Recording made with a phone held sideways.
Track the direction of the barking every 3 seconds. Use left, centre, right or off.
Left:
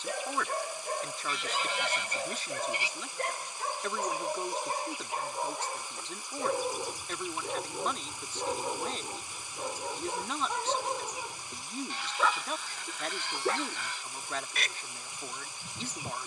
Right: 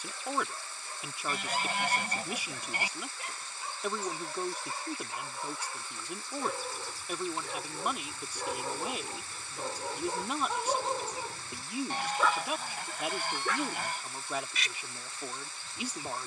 left, left, left, centre, left, left.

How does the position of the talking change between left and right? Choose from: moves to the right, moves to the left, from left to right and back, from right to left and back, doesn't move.
doesn't move.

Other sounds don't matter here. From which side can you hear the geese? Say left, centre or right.
right.